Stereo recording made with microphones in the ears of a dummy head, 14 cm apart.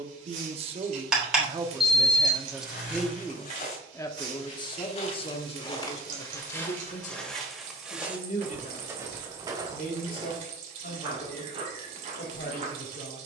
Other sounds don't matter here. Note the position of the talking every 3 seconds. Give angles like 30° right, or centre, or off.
20° right, 30° left, 50° left, 60° left, 70° left.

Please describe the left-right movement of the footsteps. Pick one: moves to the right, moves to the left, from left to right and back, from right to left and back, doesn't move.
moves to the right.